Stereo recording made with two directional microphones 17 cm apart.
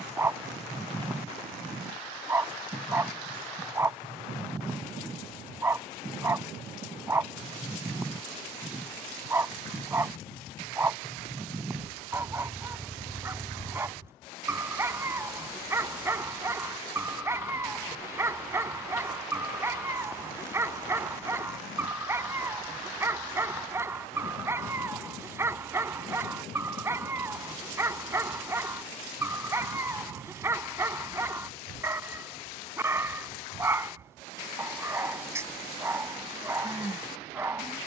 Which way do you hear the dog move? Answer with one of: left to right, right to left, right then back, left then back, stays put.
stays put.